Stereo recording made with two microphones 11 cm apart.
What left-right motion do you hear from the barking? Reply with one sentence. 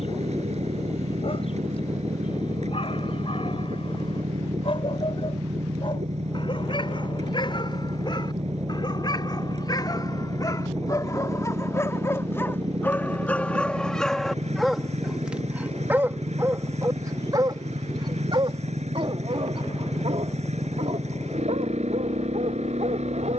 You can hear the barking go from the left side to the right.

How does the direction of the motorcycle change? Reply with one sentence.
In this clip you hear the motorcycle stay in one place.